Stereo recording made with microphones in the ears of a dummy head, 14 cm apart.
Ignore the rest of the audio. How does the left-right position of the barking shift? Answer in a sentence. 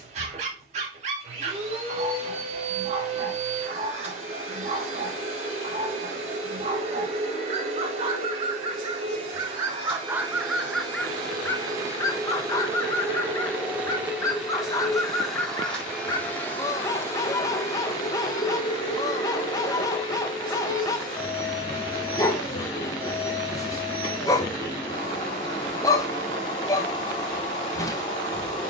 You can hear the barking move to the left.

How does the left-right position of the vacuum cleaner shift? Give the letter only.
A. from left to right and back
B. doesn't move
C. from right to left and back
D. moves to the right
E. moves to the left
E.